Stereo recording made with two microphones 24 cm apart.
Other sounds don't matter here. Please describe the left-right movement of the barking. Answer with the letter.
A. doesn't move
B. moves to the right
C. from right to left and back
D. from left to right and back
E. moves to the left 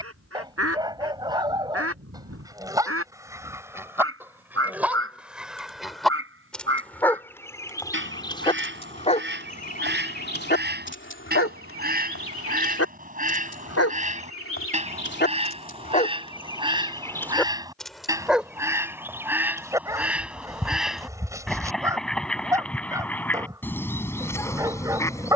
C.